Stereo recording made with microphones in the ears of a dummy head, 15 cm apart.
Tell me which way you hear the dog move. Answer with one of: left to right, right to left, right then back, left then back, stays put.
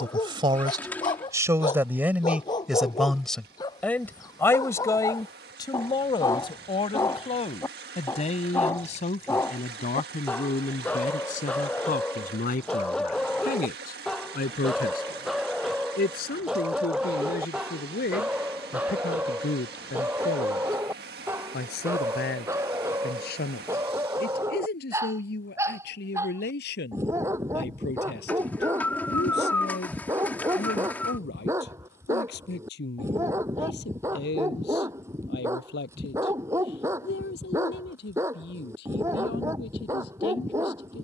left to right.